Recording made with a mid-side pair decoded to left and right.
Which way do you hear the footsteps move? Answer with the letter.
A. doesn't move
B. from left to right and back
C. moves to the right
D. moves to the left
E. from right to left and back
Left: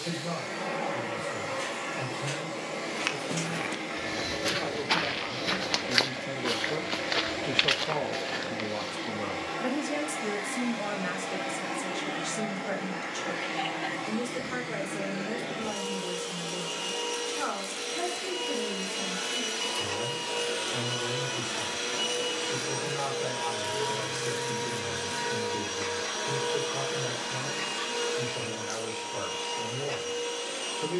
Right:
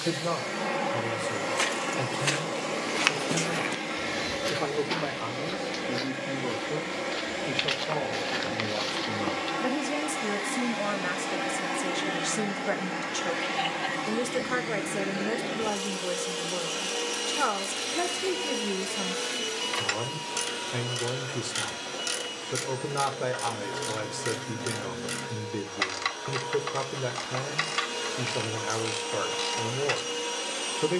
E.